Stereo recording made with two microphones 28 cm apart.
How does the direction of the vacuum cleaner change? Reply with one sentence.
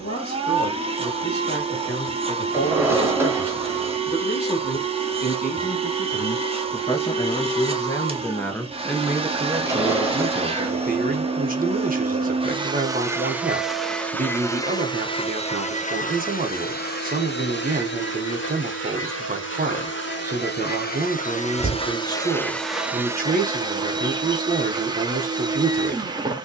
You can hear the vacuum cleaner move from right to left and back again.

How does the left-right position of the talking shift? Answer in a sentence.
You can hear the talking go from the left side to the right.